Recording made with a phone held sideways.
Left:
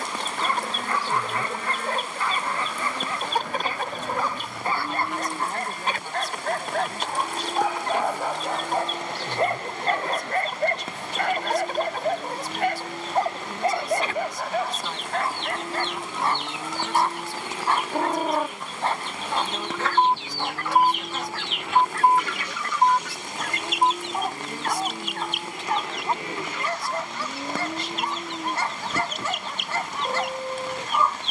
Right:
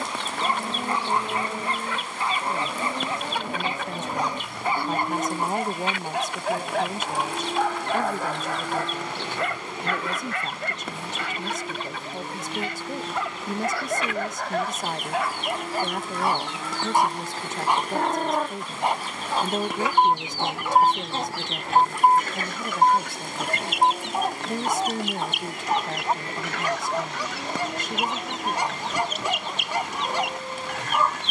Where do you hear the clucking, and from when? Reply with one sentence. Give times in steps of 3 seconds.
In this clip you hear the clucking on the left from 0 s, in the centre from 18 s and on the right from 21 s.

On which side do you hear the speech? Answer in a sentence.
You can hear the speech on the right.